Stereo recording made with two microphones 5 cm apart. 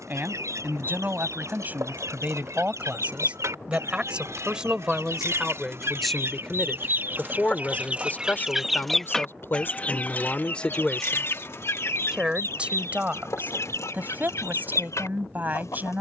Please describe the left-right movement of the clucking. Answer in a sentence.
You can hear the clucking go from the right side to the left.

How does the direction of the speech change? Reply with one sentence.
In this clip you hear the speech go left and come back.